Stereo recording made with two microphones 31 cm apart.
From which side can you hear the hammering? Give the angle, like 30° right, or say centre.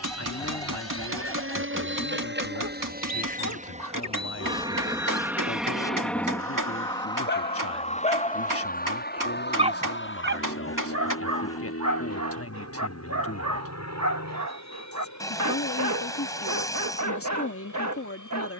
80° right.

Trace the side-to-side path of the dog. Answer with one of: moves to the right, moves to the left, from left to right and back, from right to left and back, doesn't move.
moves to the right.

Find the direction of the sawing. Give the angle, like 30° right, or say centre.
10° left.